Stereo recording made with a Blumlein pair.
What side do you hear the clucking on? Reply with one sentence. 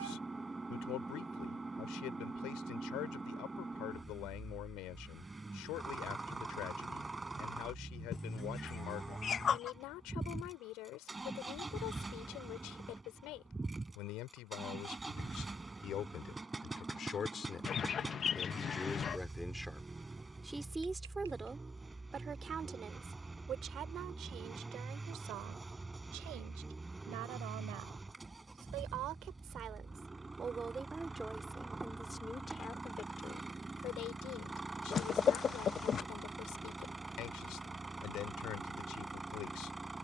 In this clip you hear the clucking on the left.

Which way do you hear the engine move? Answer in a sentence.
You can hear the engine stay put.